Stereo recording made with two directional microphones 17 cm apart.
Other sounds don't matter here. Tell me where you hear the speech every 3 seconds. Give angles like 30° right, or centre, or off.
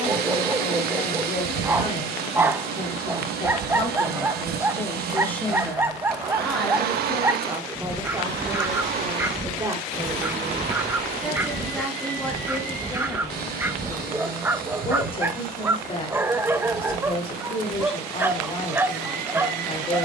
40° left, 20° left, 10° right, 10° right, 20° left, 30° left, 30° left.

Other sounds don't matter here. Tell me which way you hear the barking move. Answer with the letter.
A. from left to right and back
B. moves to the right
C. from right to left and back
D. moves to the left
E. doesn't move
E.